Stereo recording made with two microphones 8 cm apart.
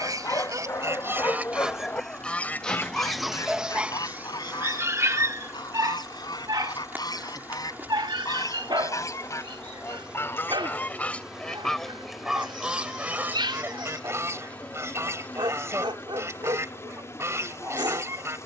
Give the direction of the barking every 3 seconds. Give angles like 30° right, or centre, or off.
30° left, 20° right, 60° right, 70° right, 70° right, 70° right.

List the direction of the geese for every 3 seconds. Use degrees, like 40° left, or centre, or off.
10° right, 50° left, 50° left, 20° left, 20° right, 40° right.